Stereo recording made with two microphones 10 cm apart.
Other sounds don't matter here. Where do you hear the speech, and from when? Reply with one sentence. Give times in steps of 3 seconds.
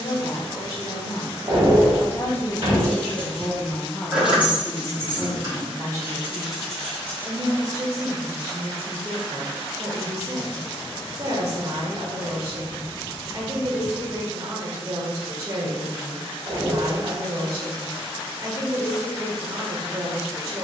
In this clip you hear the speech on the left from 0 s, in the centre from 3 s and on the right from 6 s.